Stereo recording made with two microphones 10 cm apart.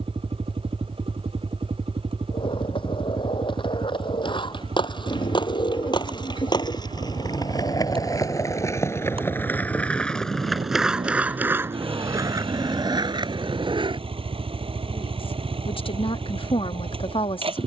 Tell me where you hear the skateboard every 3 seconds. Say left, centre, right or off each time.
left, left, left, centre, right, off.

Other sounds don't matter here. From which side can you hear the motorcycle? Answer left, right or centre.
right.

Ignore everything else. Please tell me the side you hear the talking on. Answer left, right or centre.
left.